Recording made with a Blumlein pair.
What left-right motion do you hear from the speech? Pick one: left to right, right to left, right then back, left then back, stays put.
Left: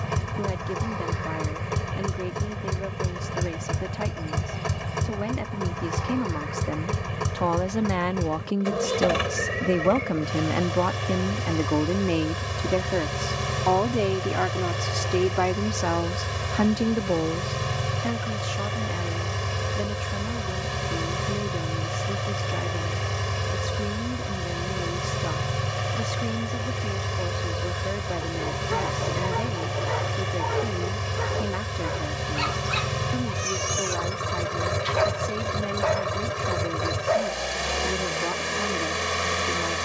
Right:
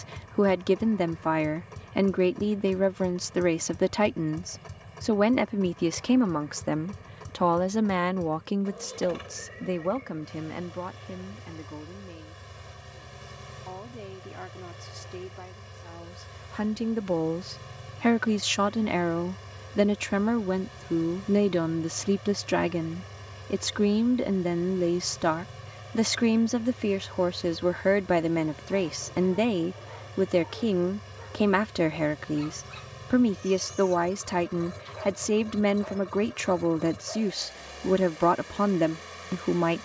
left then back.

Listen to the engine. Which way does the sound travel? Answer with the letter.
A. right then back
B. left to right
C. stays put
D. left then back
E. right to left
C.